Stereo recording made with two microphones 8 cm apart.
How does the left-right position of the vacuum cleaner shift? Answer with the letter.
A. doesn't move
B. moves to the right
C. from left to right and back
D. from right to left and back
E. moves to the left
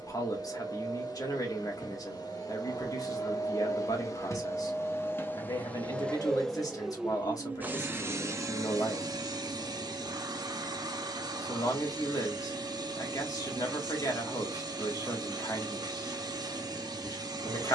B.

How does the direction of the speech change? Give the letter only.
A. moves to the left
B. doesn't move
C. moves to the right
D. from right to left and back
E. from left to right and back
B.